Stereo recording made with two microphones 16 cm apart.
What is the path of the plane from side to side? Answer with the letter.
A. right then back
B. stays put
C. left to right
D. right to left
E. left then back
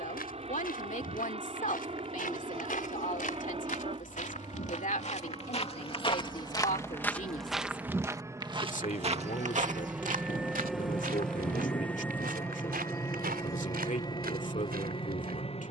D.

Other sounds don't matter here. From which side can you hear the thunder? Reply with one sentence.
You can hear the thunder on the left.